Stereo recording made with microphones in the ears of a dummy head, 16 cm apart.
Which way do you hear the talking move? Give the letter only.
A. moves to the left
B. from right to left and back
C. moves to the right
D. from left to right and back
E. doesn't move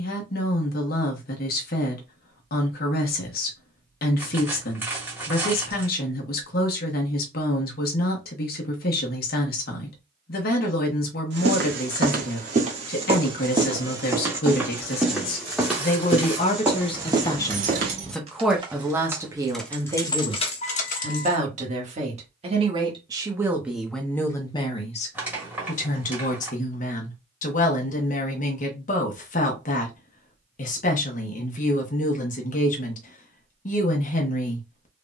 D.